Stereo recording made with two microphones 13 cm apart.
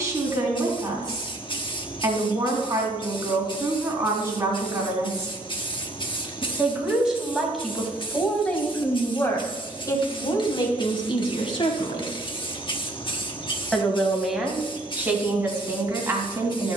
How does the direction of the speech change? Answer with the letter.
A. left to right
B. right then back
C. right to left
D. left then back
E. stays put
D.